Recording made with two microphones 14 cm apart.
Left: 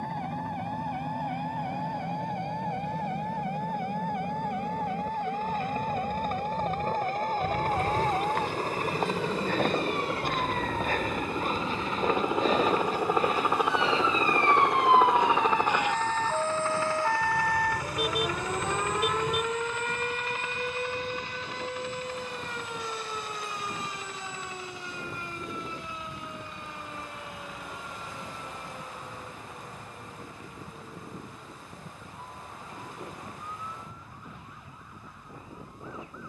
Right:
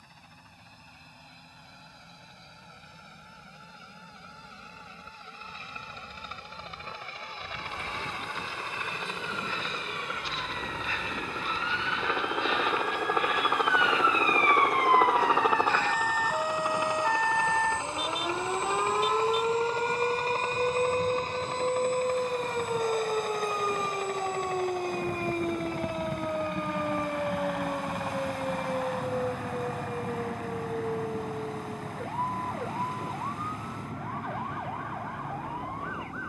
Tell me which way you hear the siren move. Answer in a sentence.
You can hear the siren travel towards the right.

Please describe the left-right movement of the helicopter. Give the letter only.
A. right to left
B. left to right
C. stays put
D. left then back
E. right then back
B.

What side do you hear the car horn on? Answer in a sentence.
In this clip you hear the car horn on the left.